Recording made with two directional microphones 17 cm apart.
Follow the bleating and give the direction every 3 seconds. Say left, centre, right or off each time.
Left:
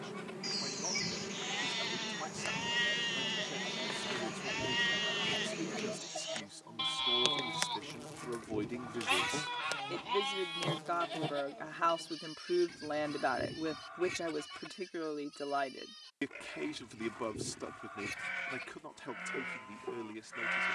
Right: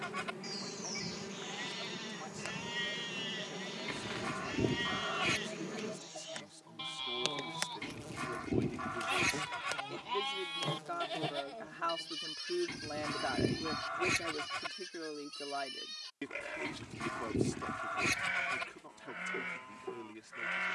left, left, left, centre, right, right, centre.